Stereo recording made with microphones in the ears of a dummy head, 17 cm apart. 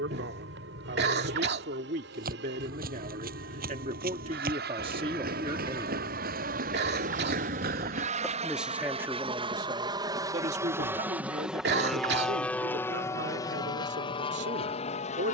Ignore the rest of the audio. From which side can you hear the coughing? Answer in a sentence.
In this clip you hear the coughing on the right.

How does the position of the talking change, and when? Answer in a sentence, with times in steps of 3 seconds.
You can hear the talking on the right from 0 s, in the centre from 6 s and on the right from 9 s.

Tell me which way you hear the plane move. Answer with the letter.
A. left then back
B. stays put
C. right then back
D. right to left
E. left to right
D.